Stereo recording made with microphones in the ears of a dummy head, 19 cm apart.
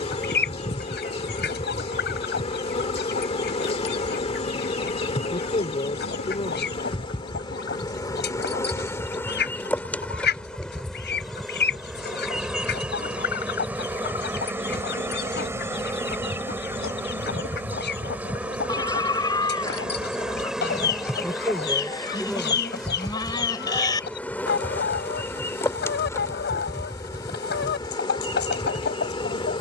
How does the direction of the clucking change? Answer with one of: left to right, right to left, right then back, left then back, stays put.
stays put.